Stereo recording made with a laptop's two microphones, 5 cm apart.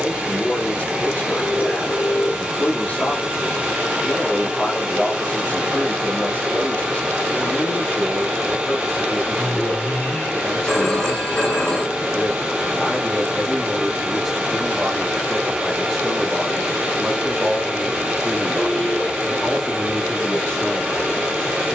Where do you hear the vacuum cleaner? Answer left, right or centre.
right.